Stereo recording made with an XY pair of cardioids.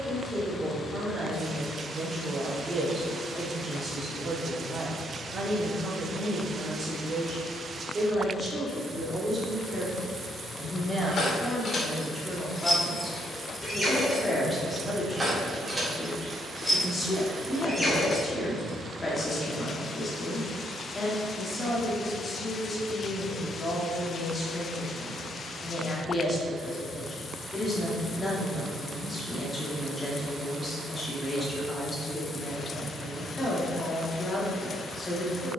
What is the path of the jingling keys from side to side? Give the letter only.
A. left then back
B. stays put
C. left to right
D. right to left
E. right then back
E.